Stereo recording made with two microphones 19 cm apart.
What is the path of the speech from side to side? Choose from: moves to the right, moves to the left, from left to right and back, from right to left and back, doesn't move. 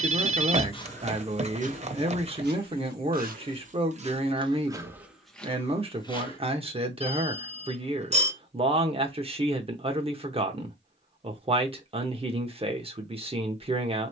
doesn't move.